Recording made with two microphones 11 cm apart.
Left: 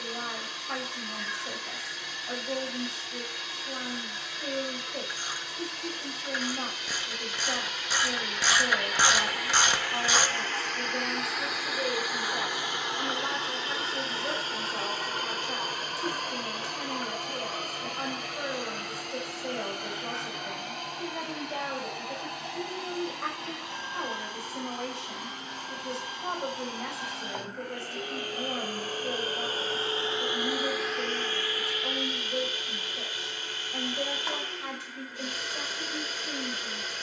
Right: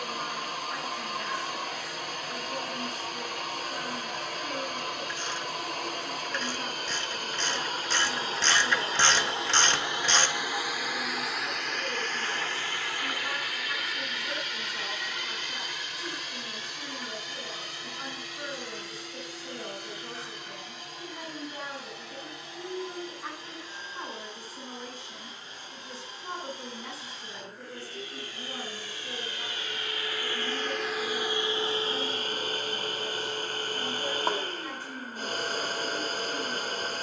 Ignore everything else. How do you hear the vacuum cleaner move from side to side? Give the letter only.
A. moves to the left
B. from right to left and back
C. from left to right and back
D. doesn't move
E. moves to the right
B.